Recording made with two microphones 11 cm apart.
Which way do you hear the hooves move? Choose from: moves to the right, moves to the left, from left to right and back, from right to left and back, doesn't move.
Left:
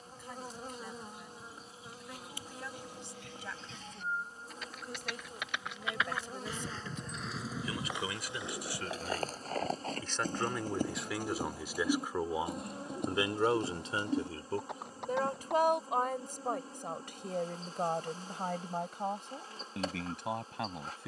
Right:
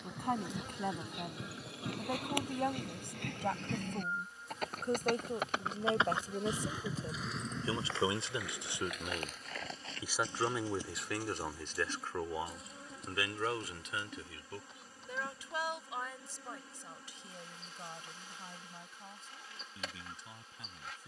moves to the left.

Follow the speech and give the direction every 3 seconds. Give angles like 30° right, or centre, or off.
60° right, 50° right, 30° right, centre, 30° left, 50° left, 70° left.